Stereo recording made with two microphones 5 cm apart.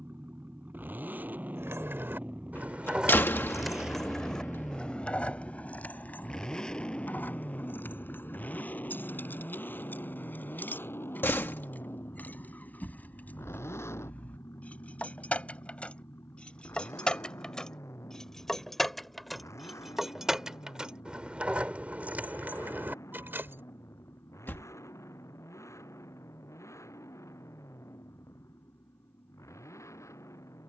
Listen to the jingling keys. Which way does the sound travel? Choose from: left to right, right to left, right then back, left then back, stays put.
left then back.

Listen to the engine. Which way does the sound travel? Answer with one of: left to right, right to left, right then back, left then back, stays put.
right to left.